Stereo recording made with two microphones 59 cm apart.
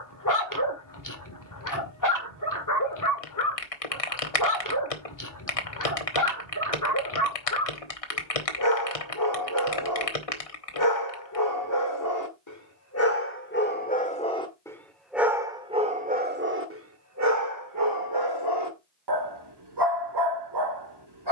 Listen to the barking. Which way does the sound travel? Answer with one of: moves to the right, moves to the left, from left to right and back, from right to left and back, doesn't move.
moves to the right.